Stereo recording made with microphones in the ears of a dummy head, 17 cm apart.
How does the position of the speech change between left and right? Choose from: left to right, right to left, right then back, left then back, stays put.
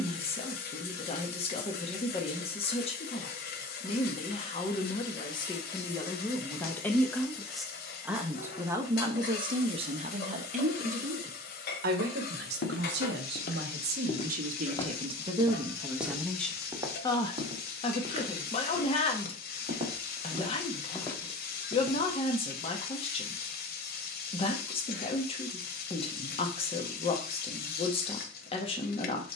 right then back.